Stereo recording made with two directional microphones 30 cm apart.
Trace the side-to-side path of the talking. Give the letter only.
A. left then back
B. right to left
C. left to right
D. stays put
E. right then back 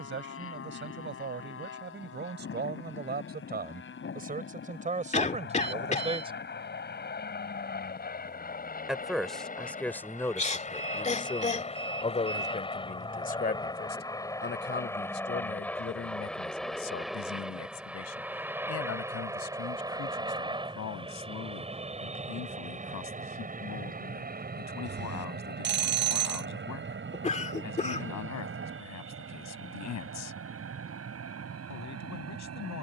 B.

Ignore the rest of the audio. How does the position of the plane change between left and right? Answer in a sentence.
You can hear the plane travel towards the right.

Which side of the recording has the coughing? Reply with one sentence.
You can hear the coughing on the left.